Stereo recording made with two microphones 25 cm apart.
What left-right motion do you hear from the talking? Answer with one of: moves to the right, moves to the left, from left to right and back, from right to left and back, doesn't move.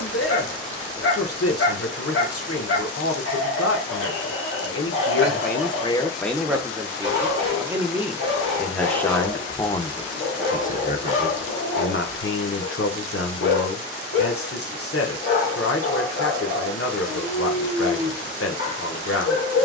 from left to right and back.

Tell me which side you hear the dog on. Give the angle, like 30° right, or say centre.
60° left.